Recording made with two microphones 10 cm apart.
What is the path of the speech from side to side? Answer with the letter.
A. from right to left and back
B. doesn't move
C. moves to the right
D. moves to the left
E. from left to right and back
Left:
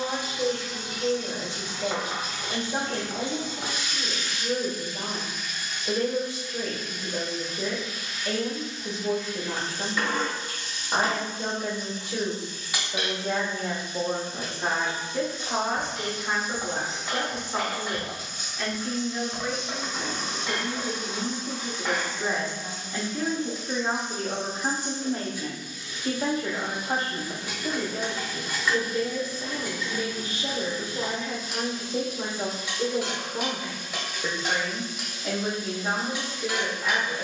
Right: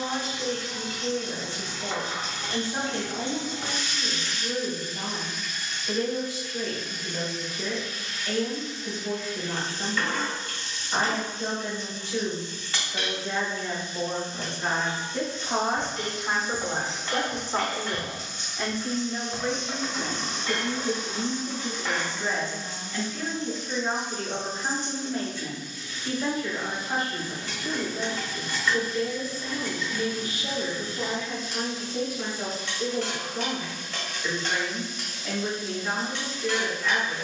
E.